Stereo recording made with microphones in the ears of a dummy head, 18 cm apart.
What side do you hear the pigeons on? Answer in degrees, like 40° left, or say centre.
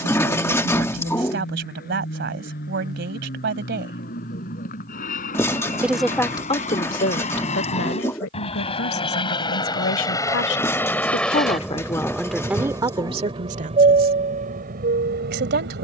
10° left.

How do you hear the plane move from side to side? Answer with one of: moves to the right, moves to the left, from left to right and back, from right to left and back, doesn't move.
moves to the right.